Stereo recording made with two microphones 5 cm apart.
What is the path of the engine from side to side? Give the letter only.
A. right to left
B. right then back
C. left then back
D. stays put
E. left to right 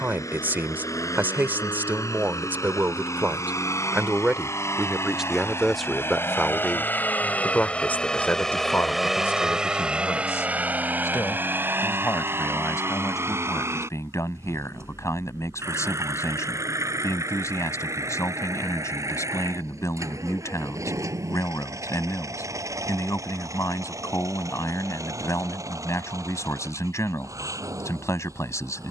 E.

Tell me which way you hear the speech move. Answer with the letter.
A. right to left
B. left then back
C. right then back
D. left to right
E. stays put
A.